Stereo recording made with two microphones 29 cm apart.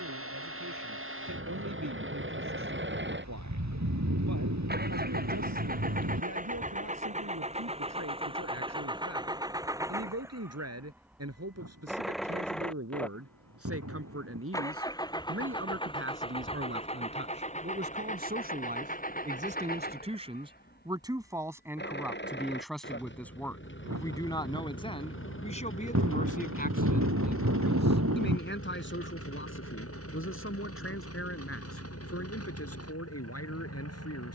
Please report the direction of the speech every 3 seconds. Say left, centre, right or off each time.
right, right, right, right, right, right, right, centre, left, left, left, left.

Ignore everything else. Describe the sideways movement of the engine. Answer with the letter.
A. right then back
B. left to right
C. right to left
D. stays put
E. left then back
C.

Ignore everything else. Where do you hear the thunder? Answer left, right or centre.
right.